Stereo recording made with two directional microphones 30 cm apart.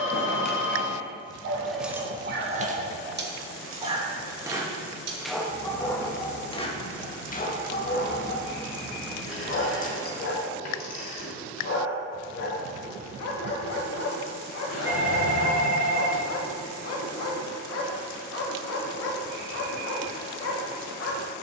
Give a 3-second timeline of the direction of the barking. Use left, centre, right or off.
right, centre, left, left, left, left, left.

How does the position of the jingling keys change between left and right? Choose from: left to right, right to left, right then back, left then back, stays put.
right then back.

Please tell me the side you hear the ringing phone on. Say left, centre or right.
left.